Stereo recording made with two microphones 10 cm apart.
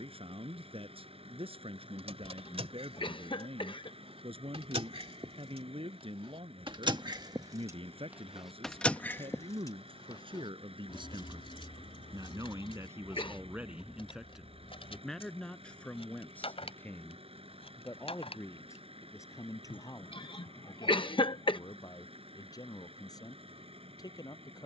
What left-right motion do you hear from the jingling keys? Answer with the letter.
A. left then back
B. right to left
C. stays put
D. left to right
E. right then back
B.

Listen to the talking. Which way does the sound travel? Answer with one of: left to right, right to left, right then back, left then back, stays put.
right to left.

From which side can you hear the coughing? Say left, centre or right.
left.